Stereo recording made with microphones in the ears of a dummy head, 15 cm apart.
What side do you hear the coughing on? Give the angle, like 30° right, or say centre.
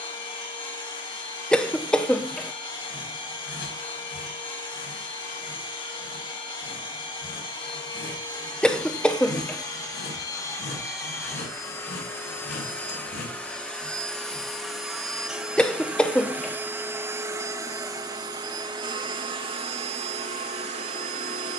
10° left.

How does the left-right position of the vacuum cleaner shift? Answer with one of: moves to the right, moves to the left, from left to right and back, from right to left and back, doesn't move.
moves to the right.